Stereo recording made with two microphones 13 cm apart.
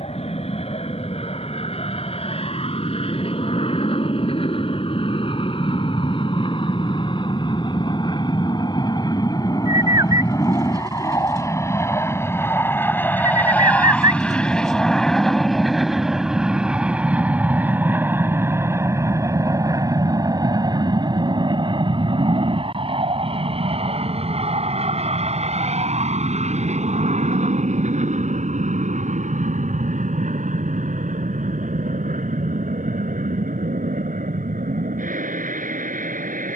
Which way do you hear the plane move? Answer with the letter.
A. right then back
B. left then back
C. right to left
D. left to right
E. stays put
D.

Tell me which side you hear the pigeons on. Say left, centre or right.
right.